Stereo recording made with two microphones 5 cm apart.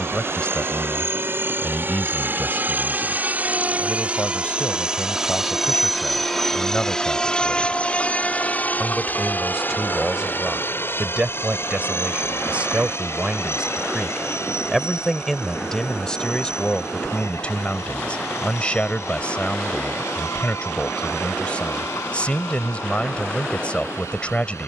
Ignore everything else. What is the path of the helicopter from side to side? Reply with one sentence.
You can hear the helicopter go from the right side to the left.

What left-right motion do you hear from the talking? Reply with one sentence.
You can hear the talking move from left to right and back again.